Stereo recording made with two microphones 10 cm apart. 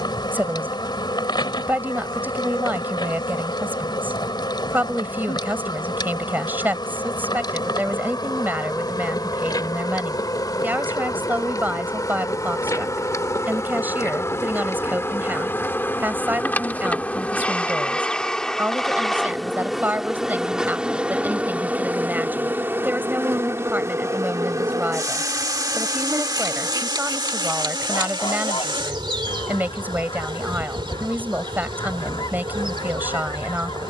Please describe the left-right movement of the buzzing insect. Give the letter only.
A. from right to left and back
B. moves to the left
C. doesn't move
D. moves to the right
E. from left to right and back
D.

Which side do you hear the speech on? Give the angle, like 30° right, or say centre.
20° right.